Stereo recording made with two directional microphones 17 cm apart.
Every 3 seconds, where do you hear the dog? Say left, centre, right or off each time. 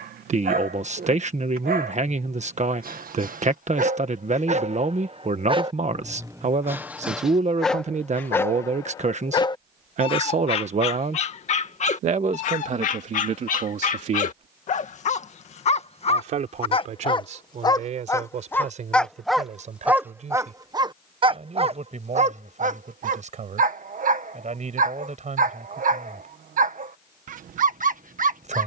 right, right, centre, left, left, left, centre, right, right, right.